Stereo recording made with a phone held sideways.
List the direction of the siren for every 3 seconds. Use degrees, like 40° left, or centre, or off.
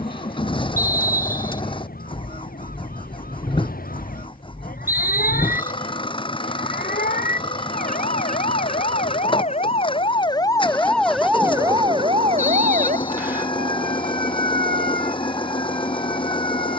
80° left, 80° left, 60° left, 20° left, 60° right, 70° right.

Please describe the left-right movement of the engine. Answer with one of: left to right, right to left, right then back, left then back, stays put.
stays put.